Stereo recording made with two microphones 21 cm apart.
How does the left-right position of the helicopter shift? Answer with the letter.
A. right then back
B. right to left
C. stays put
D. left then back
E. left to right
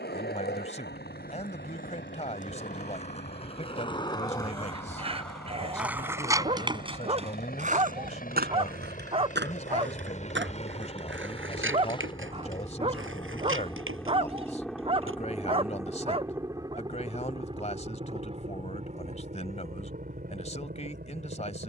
E.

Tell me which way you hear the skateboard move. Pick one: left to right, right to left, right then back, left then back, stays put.
left to right.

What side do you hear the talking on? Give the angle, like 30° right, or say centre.
30° left.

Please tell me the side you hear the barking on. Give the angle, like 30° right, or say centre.
30° right.